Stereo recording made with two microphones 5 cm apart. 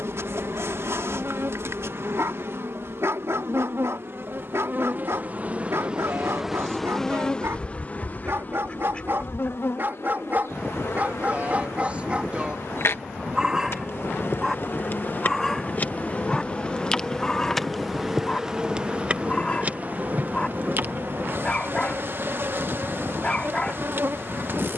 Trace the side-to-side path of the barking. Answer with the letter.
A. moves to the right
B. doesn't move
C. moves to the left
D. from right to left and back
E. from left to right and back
C.